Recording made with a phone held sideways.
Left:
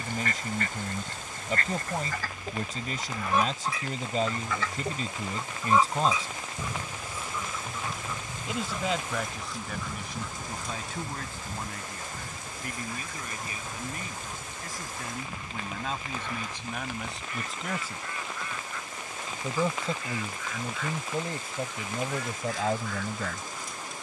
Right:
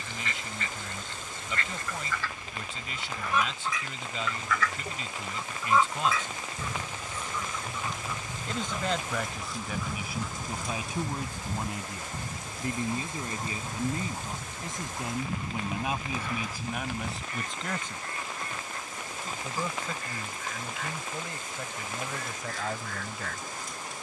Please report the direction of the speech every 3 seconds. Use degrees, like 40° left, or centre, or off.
40° left, 40° left, 20° left, 10° right, 30° right, 10° right, 30° left, 30° left.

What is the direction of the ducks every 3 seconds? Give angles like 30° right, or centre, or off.
50° left, 30° left, 10° left, 10° right, 30° right, 40° right, 40° right, 50° right.